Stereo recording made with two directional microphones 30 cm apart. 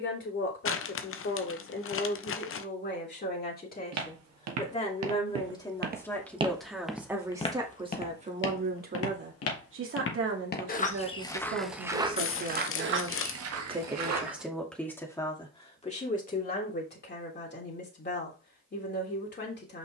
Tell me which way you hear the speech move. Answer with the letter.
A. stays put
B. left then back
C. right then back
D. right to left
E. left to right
C.